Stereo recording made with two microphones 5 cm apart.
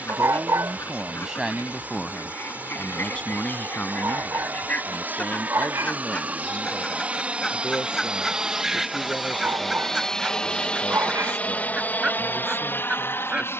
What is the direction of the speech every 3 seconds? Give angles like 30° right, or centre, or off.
10° right, 40° left, 50° left, 60° left, 60° left.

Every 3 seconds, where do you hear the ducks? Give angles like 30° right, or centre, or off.
60° left, 40° left, 10° left, 20° right, 20° right.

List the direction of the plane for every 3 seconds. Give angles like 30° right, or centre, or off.
50° right, 50° right, 20° right, 20° left, 50° left.